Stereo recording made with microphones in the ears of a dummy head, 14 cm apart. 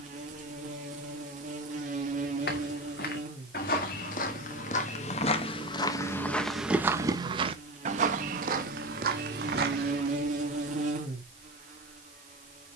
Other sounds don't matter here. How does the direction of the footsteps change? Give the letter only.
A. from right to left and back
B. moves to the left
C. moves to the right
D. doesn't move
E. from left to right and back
C.